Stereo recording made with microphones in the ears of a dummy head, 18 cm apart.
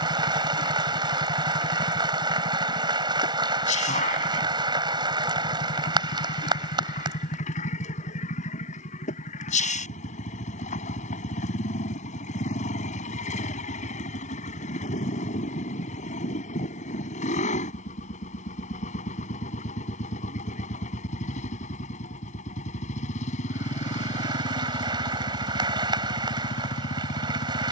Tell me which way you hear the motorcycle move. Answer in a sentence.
In this clip you hear the motorcycle stay in one place.